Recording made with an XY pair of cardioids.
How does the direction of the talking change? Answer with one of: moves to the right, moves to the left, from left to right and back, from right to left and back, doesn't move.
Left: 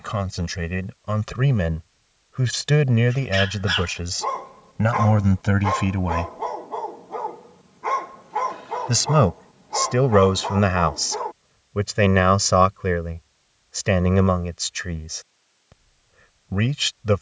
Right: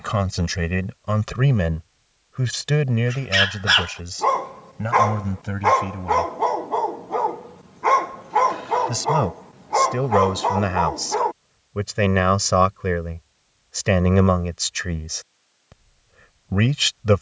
from right to left and back.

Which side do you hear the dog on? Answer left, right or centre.
right.